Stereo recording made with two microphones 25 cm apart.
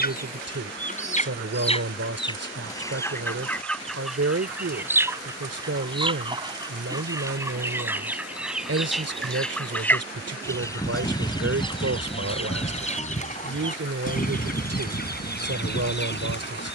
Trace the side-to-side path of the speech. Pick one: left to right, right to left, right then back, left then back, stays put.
stays put.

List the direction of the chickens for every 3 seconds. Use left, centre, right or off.
left, centre, centre, centre, left, left.